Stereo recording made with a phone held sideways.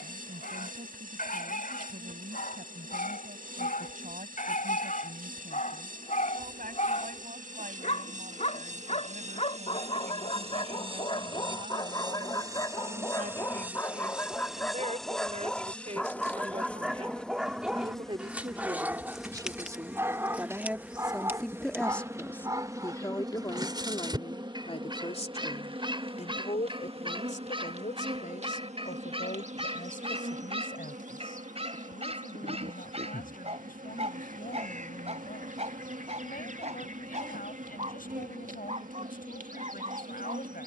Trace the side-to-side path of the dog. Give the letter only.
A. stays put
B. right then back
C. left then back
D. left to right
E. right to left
D.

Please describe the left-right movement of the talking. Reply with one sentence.
In this clip you hear the talking go from the right side to the left.